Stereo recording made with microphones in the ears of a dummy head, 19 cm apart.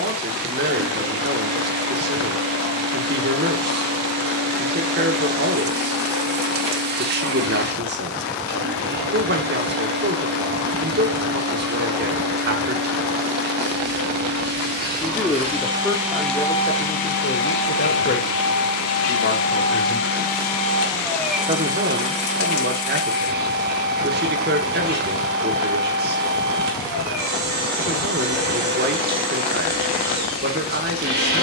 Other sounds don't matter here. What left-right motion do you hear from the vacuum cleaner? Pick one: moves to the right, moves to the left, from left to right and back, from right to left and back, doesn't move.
from right to left and back.